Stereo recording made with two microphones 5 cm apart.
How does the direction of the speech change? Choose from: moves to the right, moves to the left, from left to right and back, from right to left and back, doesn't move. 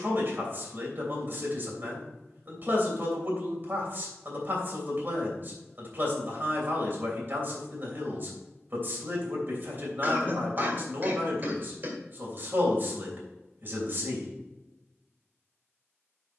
doesn't move.